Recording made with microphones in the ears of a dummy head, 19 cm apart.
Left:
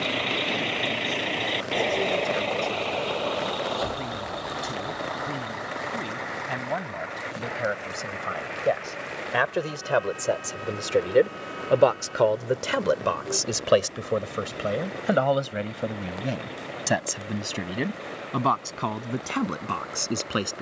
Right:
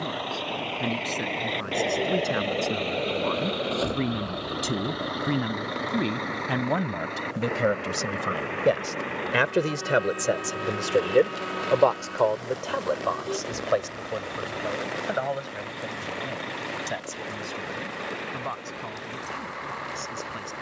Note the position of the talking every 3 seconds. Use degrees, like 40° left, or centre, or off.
70° right, 70° right, 50° right, 10° right, 40° left, 60° left, 70° left.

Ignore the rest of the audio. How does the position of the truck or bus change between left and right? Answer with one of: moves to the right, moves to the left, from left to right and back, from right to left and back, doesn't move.
moves to the right.